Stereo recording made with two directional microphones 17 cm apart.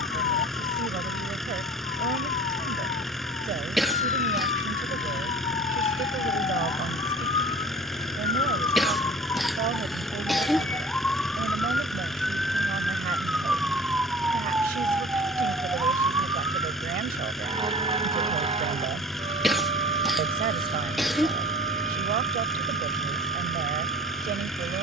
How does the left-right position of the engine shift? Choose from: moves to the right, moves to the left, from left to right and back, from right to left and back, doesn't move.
doesn't move.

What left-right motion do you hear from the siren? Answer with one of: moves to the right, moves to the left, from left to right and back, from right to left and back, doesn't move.
moves to the right.